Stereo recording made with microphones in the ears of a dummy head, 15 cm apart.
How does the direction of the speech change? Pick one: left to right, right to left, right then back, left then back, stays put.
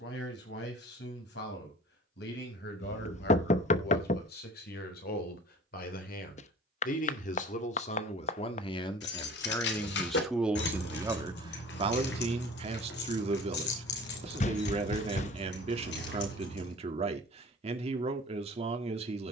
left to right.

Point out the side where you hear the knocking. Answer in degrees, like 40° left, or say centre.
40° left.